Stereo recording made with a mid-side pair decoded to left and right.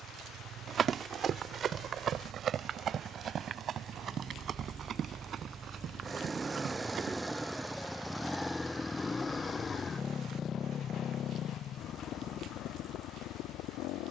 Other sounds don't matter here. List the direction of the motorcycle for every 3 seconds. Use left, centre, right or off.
right, right, centre, left, left.